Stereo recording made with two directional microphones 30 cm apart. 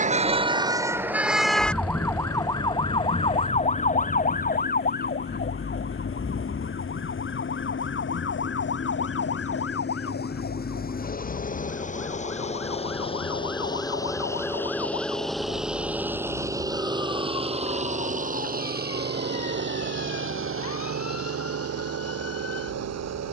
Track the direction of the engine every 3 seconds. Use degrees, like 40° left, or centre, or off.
50° left, 50° left, 40° left, 30° left, 20° left, 10° right, 40° right, 60° right.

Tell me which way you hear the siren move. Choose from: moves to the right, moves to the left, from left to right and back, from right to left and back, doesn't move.
moves to the left.